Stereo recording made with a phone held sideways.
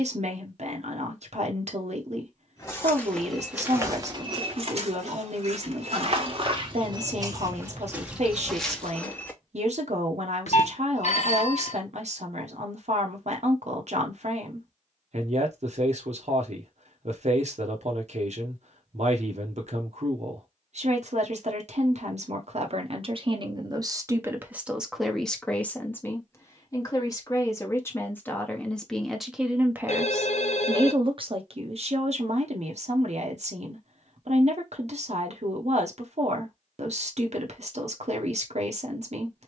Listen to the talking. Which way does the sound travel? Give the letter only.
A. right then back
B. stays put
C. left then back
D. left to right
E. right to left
C.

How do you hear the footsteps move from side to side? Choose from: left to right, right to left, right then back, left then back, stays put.
right then back.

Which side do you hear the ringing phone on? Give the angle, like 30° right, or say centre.
60° left.